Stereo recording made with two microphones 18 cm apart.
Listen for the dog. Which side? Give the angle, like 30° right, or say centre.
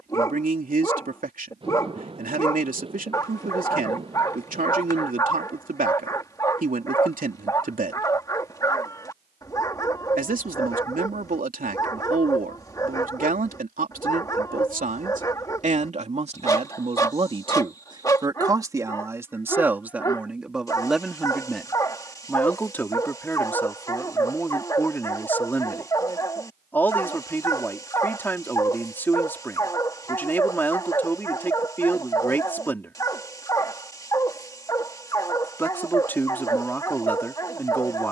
20° left.